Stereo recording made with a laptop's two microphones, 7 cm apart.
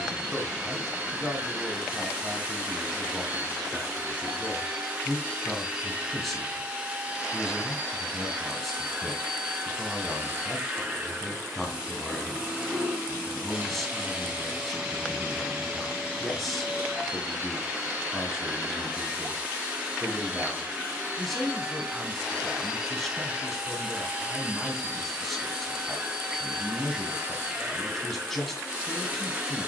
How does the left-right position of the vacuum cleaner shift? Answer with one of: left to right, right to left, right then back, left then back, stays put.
stays put.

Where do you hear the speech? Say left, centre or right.
centre.